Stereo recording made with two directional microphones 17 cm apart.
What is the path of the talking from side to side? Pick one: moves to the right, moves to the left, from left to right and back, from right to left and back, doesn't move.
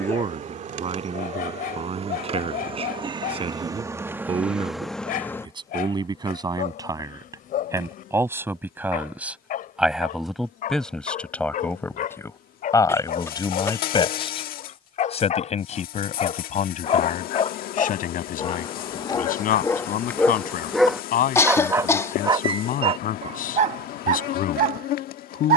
moves to the left.